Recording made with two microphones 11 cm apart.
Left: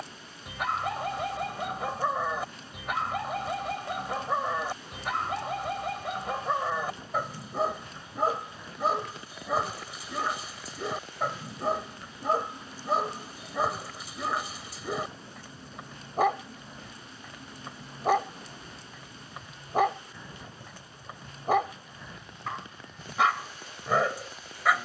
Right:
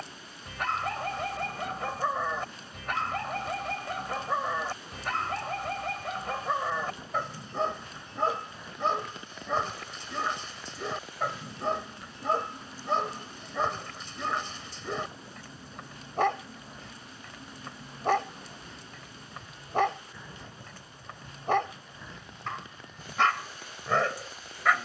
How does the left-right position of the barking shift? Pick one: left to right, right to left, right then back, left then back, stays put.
stays put.